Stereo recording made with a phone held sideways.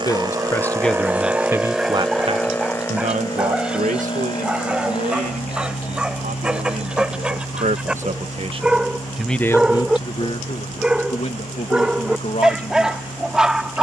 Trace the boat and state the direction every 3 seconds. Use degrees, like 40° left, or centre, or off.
10° right, 40° left, 60° left, 60° left, 70° left.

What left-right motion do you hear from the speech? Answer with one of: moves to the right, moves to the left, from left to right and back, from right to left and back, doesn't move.
from left to right and back.